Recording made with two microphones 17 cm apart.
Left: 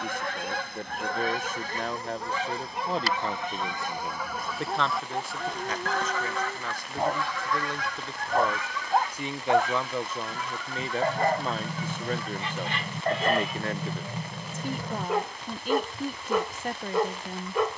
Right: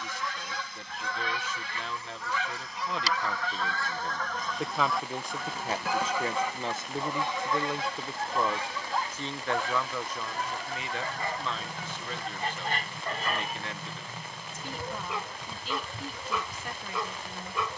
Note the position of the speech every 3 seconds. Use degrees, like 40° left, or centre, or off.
50° left, centre, 20° right, 30° left, 50° left, 50° left.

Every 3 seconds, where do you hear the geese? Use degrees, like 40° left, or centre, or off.
40° left, 10° left, 20° right, 40° right, 50° right, 60° right.